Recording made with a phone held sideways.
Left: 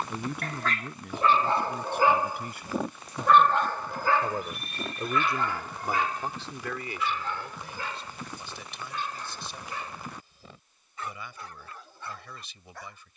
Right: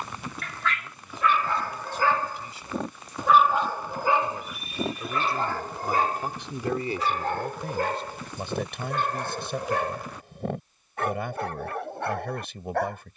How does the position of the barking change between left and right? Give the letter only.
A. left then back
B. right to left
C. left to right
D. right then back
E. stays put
C.